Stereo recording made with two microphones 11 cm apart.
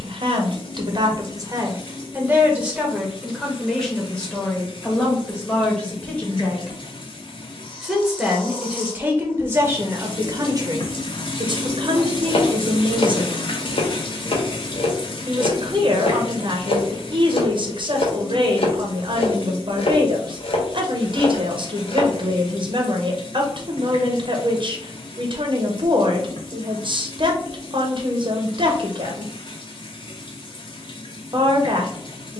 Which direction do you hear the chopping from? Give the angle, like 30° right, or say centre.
60° left.